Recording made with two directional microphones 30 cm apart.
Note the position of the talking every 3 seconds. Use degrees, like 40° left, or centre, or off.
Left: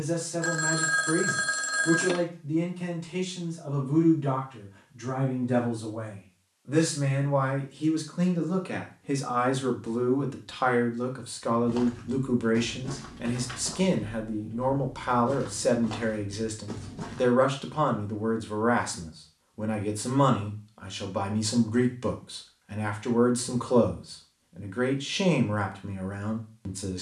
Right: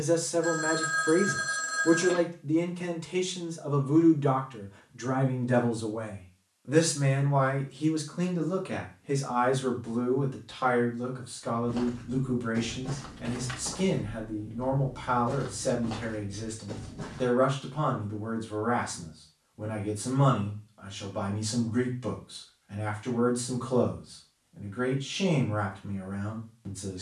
40° right, 30° right, 10° right, 30° left, 40° left, 40° left, 40° left, 40° left, 40° left.